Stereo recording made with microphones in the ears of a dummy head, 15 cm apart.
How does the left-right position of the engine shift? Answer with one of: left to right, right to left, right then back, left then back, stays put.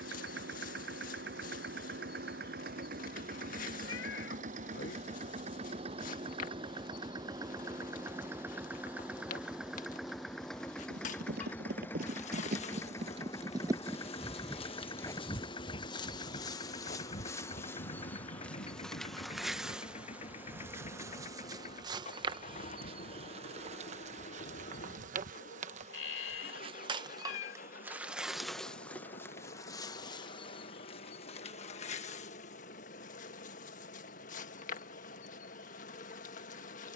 right to left.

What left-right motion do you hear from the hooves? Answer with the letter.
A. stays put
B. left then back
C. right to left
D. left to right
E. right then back
C.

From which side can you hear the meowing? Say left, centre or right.
left.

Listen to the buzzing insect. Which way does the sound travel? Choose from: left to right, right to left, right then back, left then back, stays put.
right then back.